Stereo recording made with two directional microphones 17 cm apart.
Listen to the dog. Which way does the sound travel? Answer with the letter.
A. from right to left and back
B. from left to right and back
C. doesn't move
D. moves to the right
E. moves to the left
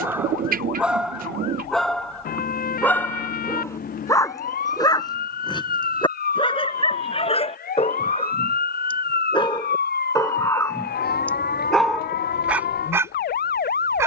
A.